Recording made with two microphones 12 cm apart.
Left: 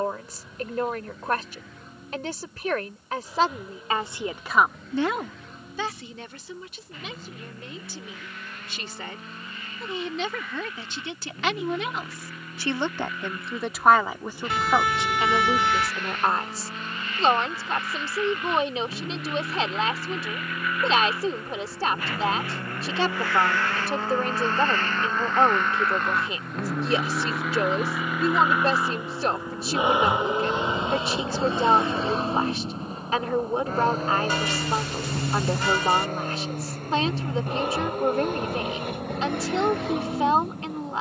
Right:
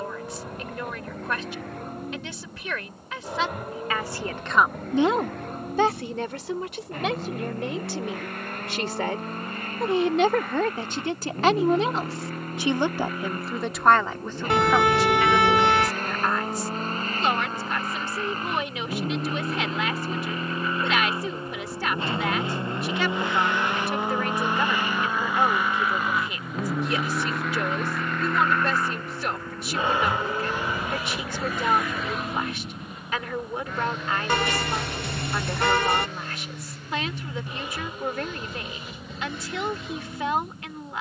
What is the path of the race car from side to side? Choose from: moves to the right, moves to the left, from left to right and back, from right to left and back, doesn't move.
moves to the left.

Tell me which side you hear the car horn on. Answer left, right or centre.
right.